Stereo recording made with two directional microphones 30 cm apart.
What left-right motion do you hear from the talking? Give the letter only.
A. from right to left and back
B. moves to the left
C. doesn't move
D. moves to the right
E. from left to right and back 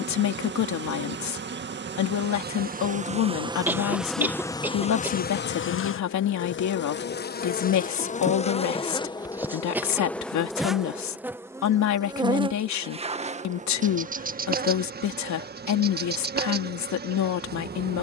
C.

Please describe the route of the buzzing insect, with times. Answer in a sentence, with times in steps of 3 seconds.
You can hear the buzzing insect on the right from 0 s, in the centre from 3 s, on the left from 6 s, in the centre from 9 s and on the right from 12 s.